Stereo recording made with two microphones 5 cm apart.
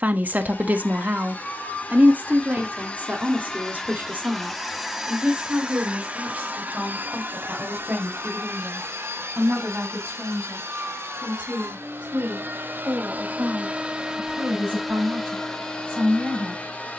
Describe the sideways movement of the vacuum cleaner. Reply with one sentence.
In this clip you hear the vacuum cleaner move from left to right and back again.